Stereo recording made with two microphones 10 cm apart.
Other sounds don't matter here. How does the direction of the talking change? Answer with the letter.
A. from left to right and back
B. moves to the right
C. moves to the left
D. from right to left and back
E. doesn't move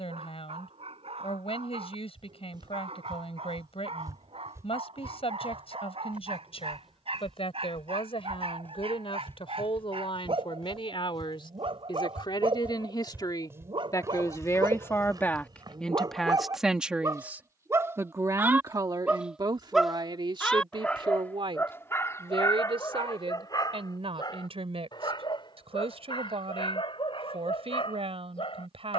B.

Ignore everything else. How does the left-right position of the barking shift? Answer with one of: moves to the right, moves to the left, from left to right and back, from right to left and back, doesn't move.
moves to the left.